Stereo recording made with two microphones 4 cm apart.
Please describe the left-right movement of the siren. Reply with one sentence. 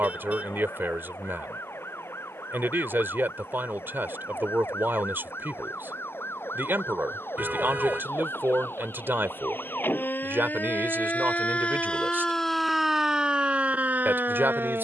In this clip you hear the siren move to the right.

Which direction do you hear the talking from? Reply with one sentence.
In this clip you hear the talking on the right.